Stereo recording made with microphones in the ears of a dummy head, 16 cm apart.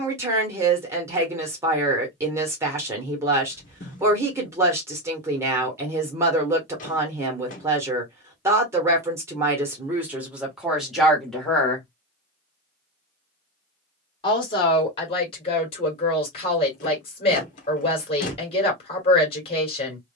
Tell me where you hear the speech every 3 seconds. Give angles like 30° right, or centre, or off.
10° right, 10° right, 10° right, 10° right, 30° left, 30° left, 30° left.